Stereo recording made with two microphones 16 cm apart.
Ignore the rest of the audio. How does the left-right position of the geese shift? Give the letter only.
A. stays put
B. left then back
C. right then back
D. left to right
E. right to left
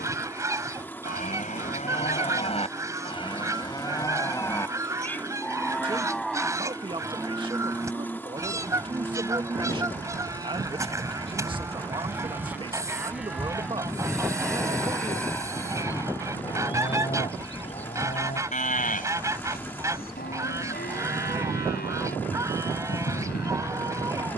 A.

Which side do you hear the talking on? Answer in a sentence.
In this clip you hear the talking on the right.